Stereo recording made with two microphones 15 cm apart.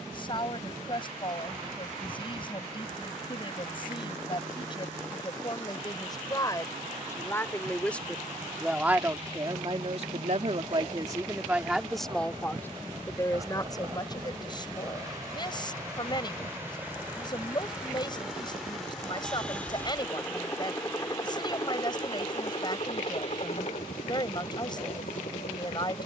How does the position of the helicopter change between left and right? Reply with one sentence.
You can hear the helicopter go from the right side to the left.